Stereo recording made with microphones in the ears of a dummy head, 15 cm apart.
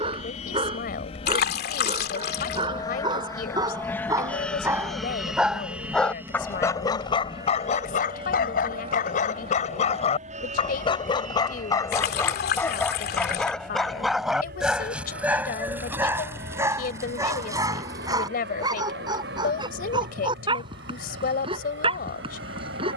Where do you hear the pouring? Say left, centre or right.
left.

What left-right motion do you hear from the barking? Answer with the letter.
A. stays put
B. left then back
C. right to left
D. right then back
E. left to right
B.